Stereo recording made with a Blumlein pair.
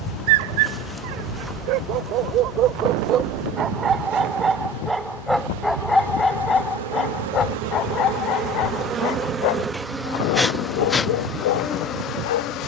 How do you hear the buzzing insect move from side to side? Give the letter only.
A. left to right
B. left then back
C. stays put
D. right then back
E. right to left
D.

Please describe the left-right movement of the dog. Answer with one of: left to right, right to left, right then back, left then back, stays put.
right to left.